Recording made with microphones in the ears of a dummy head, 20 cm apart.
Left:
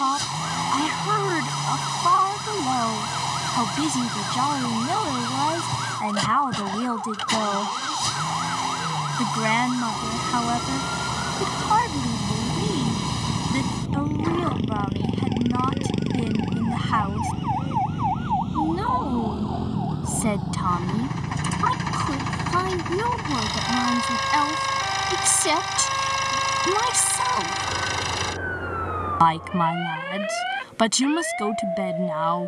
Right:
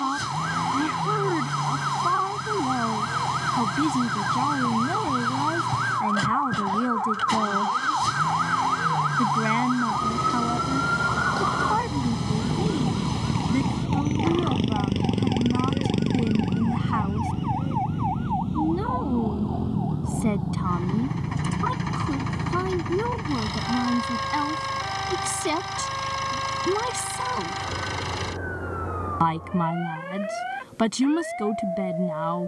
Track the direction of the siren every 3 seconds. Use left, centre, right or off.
right, right, right, right, right, centre, left, left, left, left, left.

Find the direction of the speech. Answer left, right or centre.
left.